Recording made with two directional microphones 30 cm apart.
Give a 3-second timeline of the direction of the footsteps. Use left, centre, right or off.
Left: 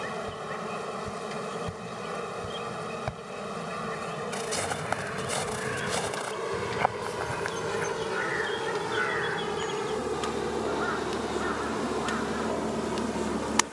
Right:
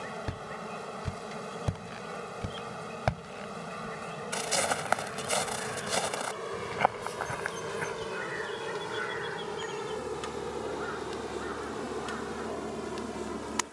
right, right, centre, off, off.